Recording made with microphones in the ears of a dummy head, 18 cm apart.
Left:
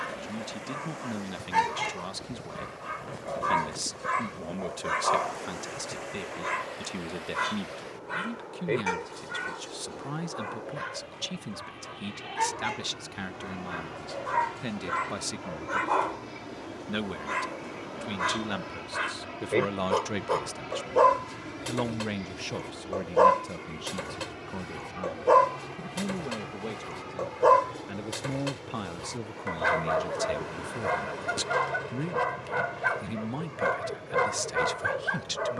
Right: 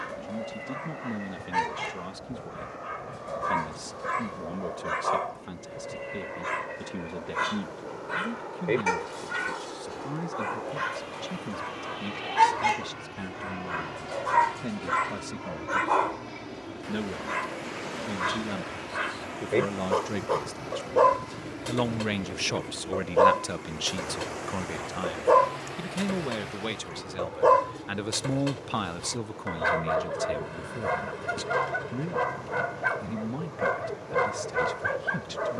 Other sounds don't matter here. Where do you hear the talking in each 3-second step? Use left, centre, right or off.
left, left, left, left, left, left, left, right, right, right, left, left.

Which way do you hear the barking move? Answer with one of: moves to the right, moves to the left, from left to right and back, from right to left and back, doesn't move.
from left to right and back.